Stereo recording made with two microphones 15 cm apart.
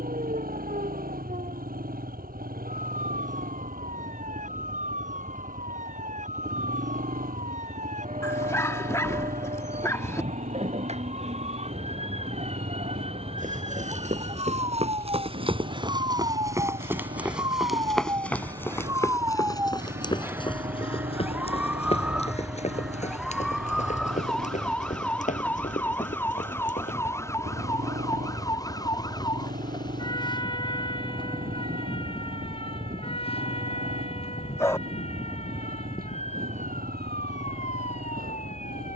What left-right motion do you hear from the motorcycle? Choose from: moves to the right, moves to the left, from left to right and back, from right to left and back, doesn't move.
doesn't move.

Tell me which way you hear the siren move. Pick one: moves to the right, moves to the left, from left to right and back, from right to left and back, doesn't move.
moves to the left.